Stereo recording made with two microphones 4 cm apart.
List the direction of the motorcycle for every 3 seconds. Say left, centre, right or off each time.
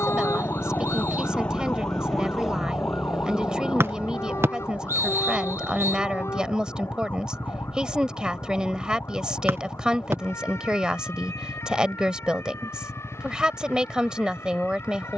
left, right, right, right, right.